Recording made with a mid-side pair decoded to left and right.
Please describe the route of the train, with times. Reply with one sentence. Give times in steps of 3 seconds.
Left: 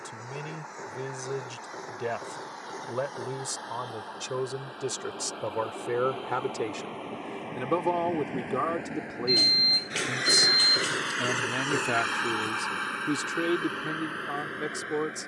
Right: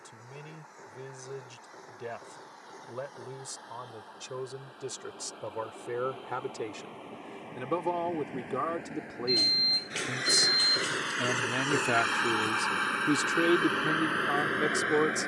In this clip you hear the train on the left from 0 s and on the right from 12 s.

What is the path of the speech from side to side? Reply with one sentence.
In this clip you hear the speech go from the left side to the right.